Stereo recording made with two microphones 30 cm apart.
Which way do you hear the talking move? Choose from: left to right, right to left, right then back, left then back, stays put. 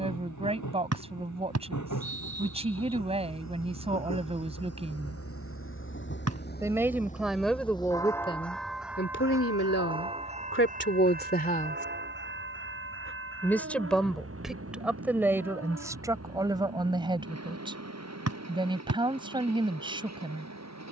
left then back.